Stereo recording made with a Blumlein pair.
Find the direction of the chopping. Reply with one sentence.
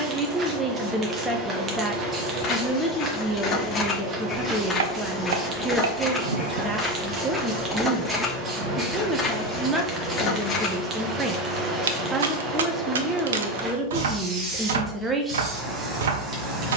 In this clip you hear the chopping on the right.